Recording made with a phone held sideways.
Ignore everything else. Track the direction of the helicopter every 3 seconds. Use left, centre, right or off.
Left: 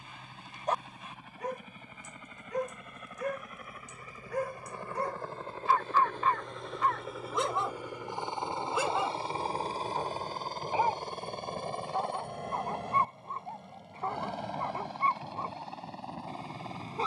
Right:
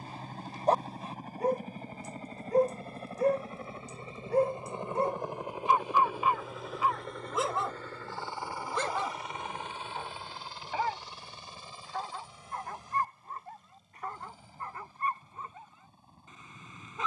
right, right, centre, left, left, left.